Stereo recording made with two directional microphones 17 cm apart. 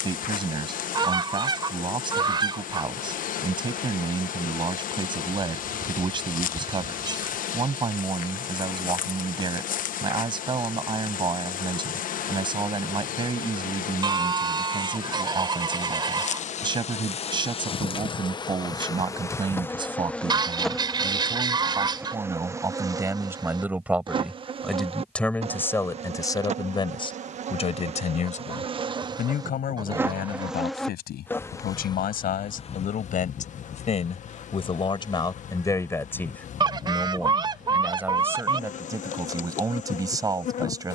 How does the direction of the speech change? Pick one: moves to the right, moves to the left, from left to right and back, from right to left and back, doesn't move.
from right to left and back.